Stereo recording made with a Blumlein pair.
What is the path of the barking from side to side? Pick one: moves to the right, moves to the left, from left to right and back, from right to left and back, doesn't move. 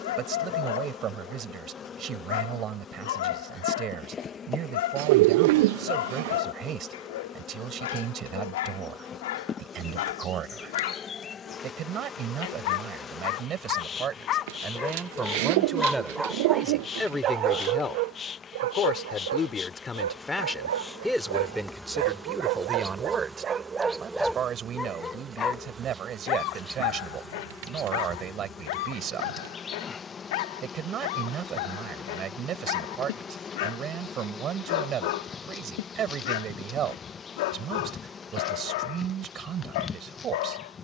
from left to right and back.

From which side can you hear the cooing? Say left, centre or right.
right.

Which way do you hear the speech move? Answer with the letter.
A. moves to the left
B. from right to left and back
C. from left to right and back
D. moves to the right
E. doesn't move
B.